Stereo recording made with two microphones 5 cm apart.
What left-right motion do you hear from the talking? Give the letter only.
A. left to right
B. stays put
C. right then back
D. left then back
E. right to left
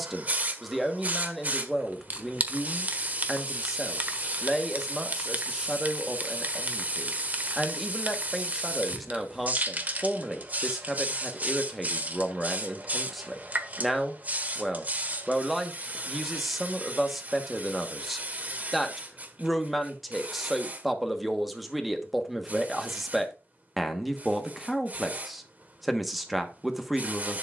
B.